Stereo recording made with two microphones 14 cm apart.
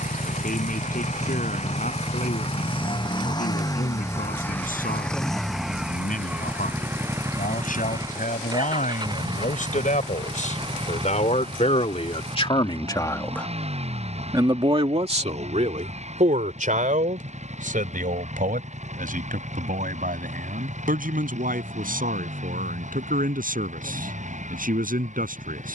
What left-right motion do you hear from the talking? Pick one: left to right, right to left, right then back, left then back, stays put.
left to right.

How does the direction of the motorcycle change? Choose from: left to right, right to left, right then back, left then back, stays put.
left to right.